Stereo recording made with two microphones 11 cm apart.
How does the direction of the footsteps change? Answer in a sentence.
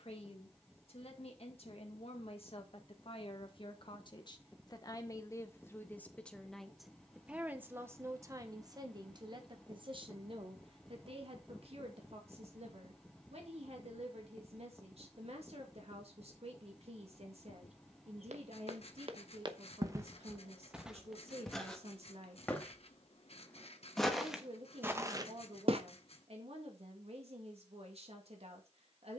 In this clip you hear the footsteps move from right to left and back again.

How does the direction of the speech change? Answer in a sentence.
In this clip you hear the speech move to the right.